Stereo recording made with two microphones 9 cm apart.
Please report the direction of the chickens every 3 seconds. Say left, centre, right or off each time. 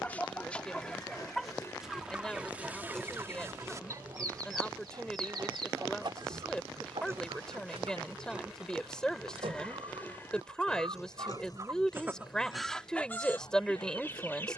centre, right, right, right, centre.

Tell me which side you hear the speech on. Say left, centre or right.
centre.